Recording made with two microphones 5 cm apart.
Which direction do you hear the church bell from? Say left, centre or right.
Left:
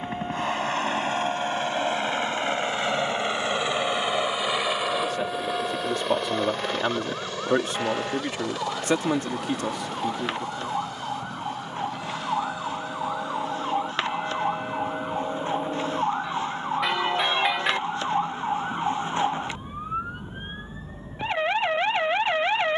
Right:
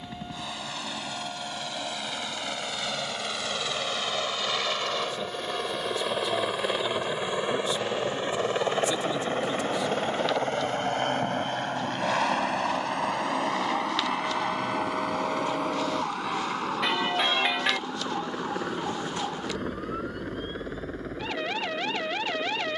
centre.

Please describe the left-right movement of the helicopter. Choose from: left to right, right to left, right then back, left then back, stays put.
left to right.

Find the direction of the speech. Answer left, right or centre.
left.